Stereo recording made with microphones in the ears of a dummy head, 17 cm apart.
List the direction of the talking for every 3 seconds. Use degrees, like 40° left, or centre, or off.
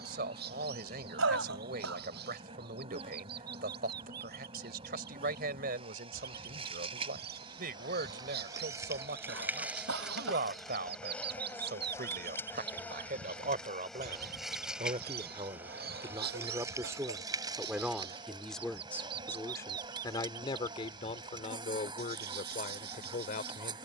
50° right, 50° right, 50° right, 50° right, 40° right, 20° right, 20° left, 40° left.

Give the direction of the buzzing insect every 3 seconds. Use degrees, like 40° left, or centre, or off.
30° right, 30° right, 30° right, centre, 10° left, 20° right, 30° right, 30° right.